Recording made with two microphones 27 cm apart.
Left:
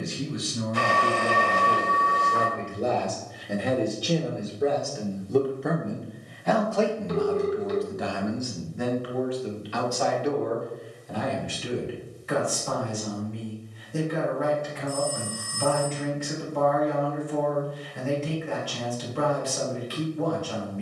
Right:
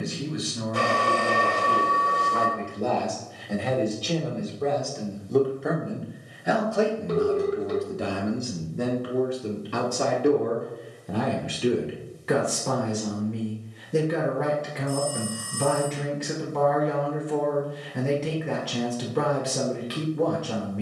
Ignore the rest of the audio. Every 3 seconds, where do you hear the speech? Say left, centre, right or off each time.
left, centre, right, right, right, right, right.